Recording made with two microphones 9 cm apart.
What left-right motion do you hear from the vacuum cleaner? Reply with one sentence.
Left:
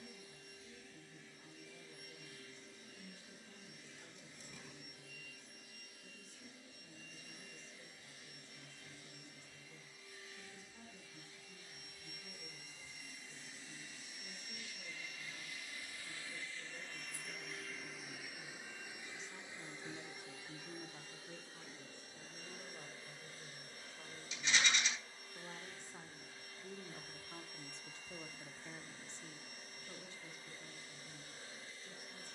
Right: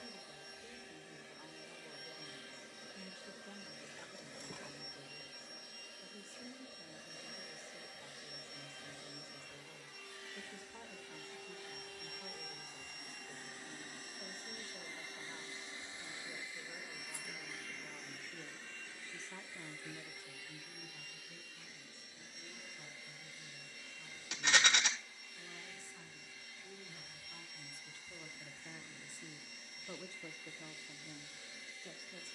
In this clip you hear the vacuum cleaner go from the right side to the left.